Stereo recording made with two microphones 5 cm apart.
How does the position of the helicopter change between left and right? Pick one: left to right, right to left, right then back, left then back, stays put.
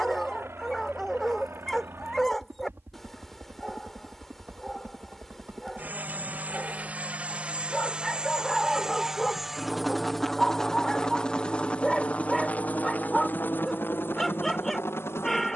right to left.